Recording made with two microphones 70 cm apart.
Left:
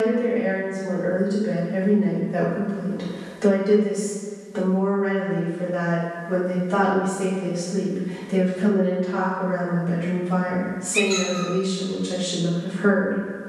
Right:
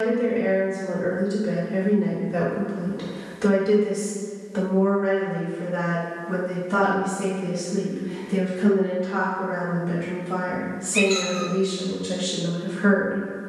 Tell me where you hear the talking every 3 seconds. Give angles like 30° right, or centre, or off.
40° right, 20° right, 20° left, centre, 30° right.